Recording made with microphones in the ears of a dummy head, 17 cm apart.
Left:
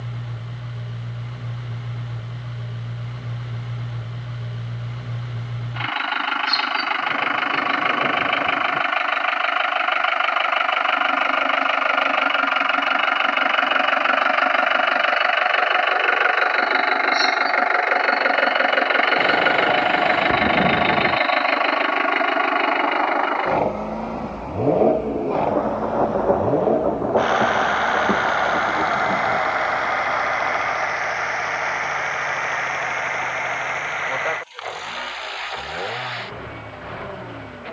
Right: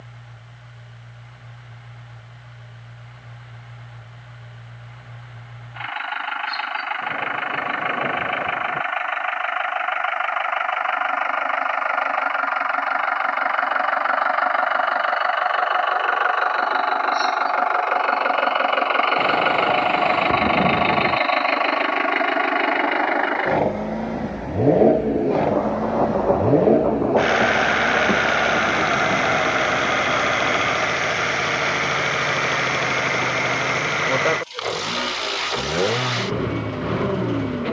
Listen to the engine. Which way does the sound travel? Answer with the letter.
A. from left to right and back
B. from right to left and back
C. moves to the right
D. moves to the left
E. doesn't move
C.